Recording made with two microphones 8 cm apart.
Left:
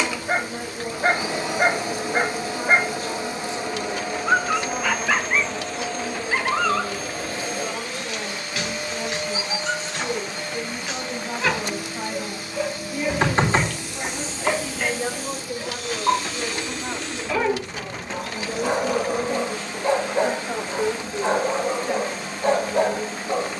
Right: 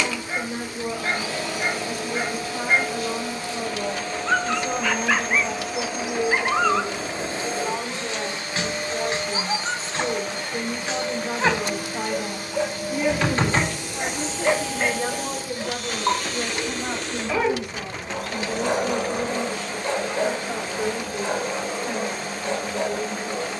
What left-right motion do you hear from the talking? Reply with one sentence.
In this clip you hear the talking move from right to left.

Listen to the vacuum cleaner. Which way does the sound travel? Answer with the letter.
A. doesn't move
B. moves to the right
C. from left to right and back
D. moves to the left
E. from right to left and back
B.